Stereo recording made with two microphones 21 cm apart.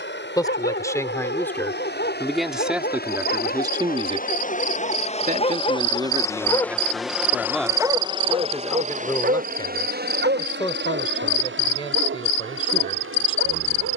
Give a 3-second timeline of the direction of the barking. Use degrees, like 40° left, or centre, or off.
60° left, 50° left, 10° right, 70° right, 80° right.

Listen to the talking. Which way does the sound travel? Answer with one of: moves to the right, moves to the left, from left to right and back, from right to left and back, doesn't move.
from left to right and back.